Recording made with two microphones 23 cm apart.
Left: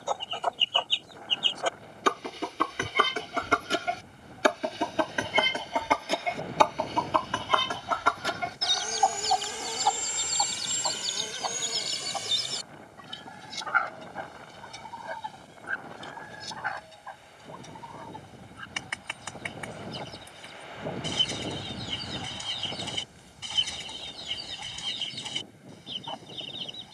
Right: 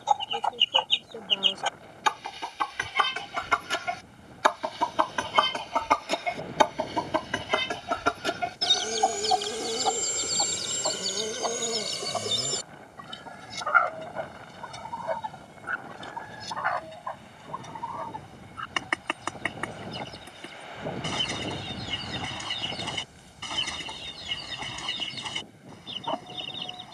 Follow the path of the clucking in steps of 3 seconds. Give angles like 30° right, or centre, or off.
50° left, 30° left, 20° right, 50° right, 60° right, 70° right, 70° right, 70° right, 70° right.